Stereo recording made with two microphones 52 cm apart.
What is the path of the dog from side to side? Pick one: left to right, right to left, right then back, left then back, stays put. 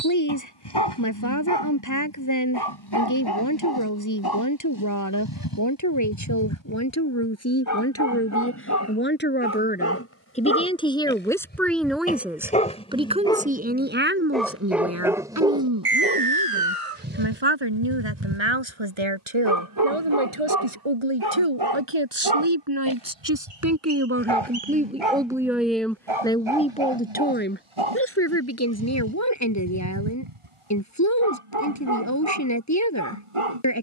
left to right.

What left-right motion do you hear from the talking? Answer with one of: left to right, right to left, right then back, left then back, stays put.
right then back.